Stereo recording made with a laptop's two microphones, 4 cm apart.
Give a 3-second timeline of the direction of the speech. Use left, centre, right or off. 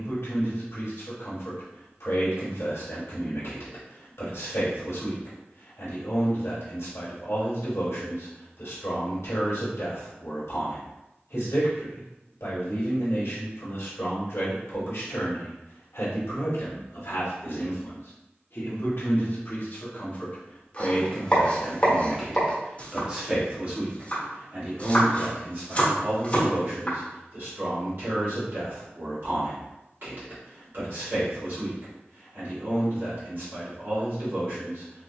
left, left, left, left, left, left, left, centre, right, right, right, right.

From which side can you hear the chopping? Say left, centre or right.
left.